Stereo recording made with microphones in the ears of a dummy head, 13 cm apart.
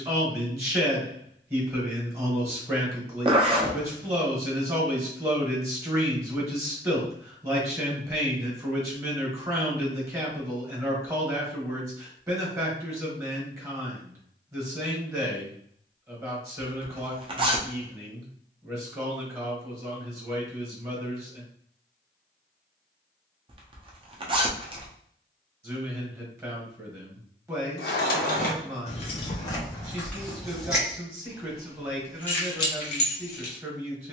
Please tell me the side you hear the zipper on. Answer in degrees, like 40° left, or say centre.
40° right.